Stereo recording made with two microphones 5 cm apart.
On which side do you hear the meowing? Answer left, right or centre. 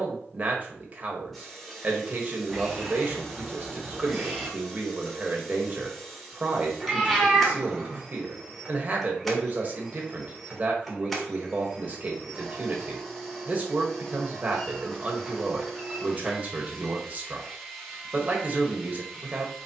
centre.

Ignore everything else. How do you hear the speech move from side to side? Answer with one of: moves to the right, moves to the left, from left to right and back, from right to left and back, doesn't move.
doesn't move.